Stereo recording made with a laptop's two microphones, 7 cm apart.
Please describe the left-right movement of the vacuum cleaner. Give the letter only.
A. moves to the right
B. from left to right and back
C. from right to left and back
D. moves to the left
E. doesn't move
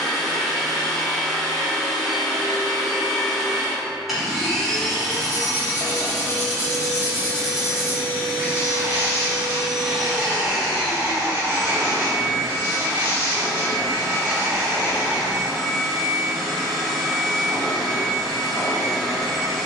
E.